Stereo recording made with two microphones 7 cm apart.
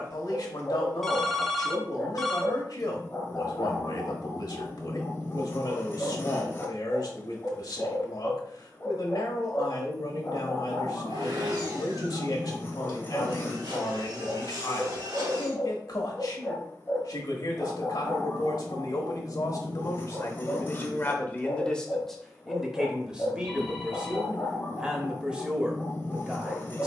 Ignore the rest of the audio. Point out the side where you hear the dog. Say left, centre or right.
left.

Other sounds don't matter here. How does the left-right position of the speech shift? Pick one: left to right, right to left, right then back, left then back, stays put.
left to right.